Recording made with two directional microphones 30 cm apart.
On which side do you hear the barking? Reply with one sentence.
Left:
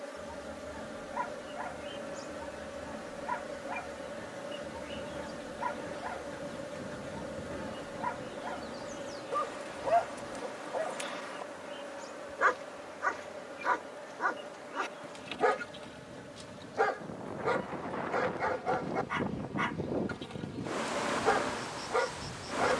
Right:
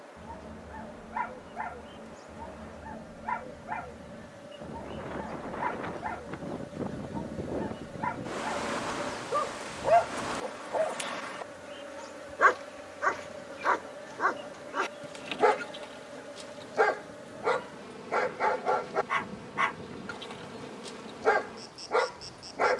You can hear the barking on the right.